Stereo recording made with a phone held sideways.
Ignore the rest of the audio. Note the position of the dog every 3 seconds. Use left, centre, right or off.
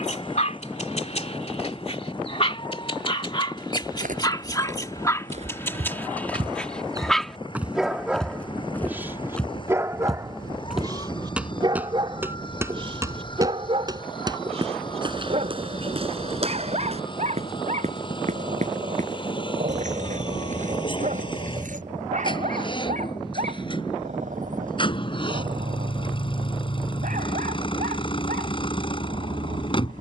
left, left, centre, right, right, right, right, right, right, right.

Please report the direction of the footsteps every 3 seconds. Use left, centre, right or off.
off, right, centre, centre, right, right, right, right, off, off.